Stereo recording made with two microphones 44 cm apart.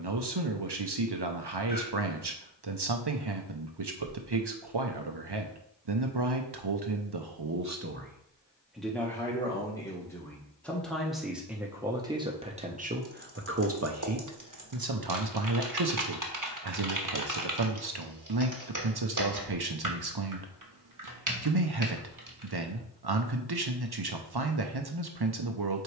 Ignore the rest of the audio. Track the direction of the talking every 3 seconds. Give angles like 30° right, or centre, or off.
60° right, 60° right, 50° right, centre, 30° right, 60° right, 60° right, 60° right, 60° right.